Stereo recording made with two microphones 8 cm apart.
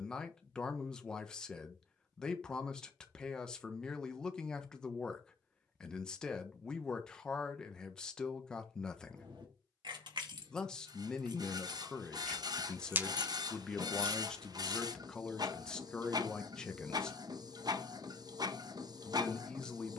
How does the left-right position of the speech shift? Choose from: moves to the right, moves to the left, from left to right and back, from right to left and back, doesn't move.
doesn't move.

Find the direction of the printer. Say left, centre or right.
right.